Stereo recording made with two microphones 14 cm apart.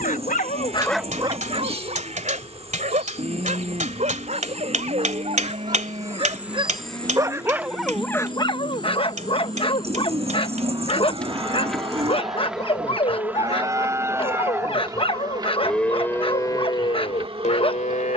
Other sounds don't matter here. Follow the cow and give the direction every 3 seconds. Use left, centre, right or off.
right, right, right, right, right, left.